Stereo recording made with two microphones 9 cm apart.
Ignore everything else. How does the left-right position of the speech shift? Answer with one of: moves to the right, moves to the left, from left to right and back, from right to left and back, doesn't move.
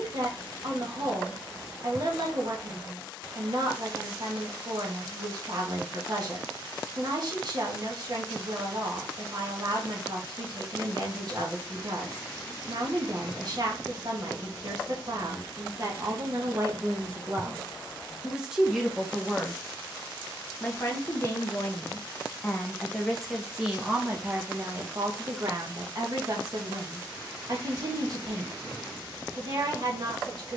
from right to left and back.